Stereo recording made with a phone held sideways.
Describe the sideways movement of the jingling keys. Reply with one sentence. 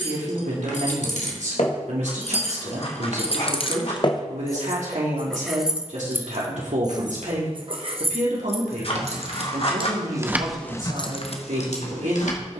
In this clip you hear the jingling keys move from left to right and back again.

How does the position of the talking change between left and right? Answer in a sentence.
You can hear the talking stay put.